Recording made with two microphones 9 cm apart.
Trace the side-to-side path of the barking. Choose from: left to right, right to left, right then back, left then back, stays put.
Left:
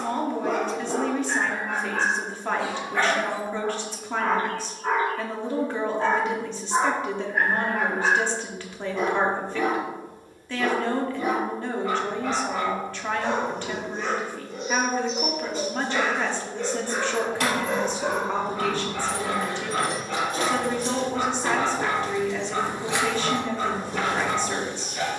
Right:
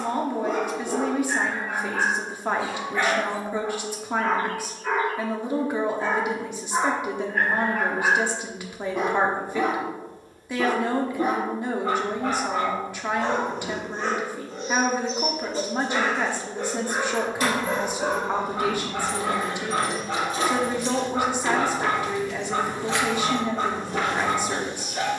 left to right.